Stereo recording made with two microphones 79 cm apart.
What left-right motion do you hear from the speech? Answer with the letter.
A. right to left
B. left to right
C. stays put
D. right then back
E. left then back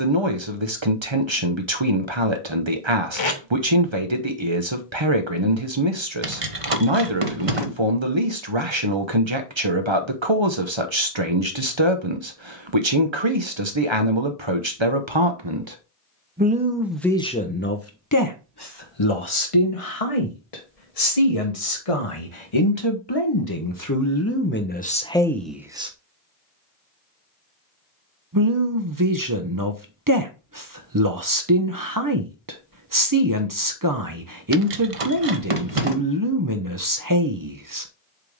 E.